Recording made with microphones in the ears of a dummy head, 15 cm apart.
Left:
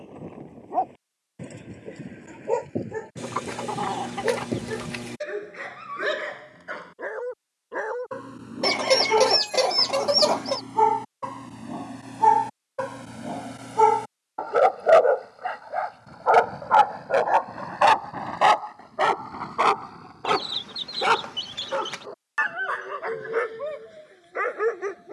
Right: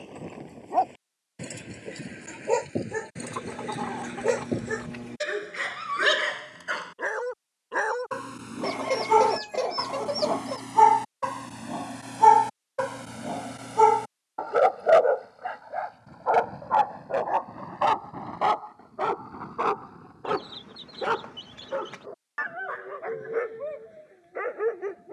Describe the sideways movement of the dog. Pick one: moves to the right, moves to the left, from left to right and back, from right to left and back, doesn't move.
moves to the left.